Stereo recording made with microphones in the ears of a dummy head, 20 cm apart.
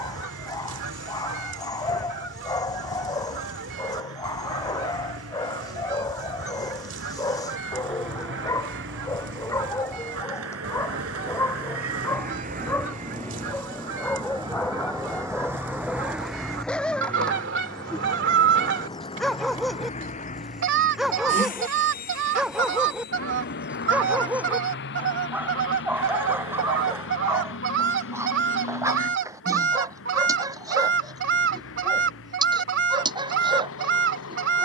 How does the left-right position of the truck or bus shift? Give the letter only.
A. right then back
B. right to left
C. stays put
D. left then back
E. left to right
B.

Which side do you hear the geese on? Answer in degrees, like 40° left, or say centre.
50° right.